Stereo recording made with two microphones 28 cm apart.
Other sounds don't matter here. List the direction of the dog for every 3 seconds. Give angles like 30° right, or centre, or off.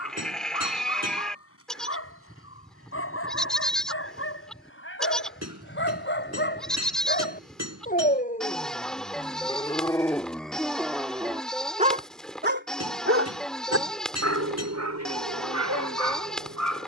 50° left, 50° left, 30° left, centre, 60° right, 80° right.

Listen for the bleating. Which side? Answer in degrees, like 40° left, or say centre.
centre.